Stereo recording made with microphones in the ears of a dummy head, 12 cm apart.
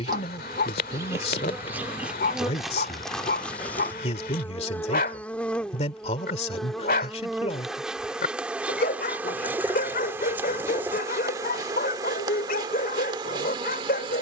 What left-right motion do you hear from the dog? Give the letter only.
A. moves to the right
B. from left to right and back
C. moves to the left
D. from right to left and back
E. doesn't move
E.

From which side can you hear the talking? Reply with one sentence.
In this clip you hear the talking on the left.